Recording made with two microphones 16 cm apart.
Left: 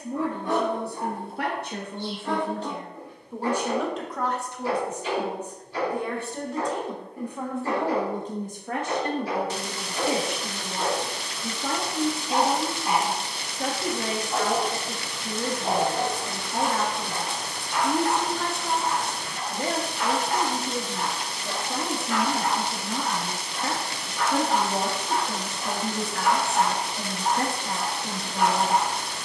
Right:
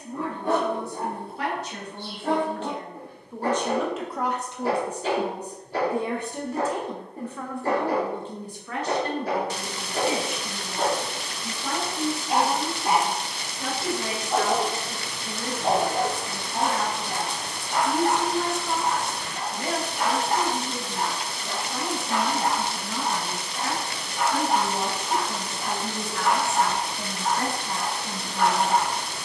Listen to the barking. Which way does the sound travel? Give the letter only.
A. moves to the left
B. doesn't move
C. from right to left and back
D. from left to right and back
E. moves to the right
A.